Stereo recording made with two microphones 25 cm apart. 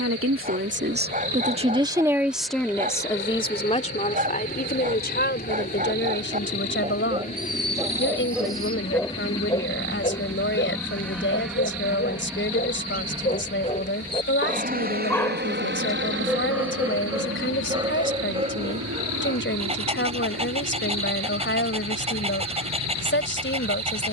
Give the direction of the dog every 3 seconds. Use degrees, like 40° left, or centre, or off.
30° right, 30° right, 10° right, 40° left, 30° left, 10° right, 20° right, 20° right.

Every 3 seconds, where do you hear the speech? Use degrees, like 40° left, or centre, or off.
20° right, 30° left, 50° left, 50° left, 50° left, 50° left, 50° left, 50° left.